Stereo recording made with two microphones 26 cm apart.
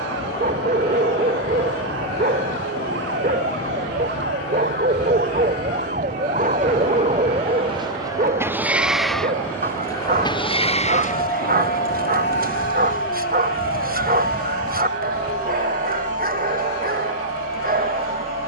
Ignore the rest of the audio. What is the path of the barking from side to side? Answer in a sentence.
In this clip you hear the barking stay in one place.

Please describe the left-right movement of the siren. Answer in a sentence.
You can hear the siren travel towards the left.